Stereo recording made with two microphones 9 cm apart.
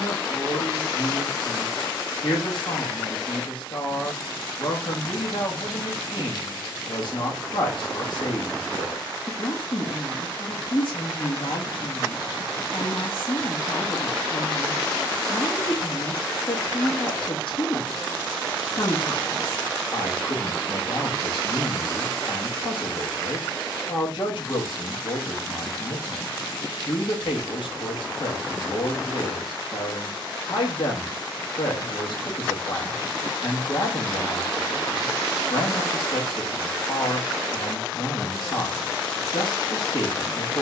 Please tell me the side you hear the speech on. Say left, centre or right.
left.